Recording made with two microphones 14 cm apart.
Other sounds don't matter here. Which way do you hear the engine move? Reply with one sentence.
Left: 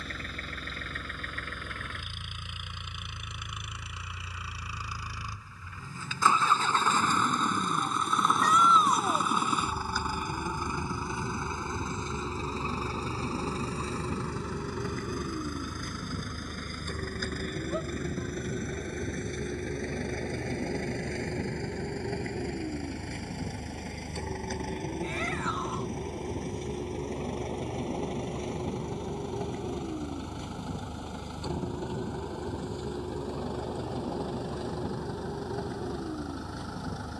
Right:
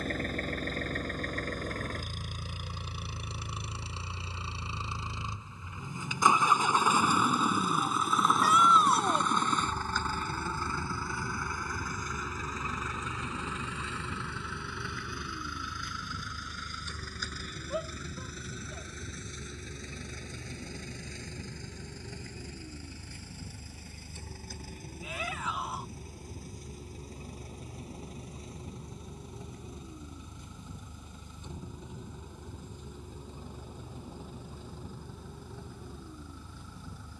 You can hear the engine move from right to left.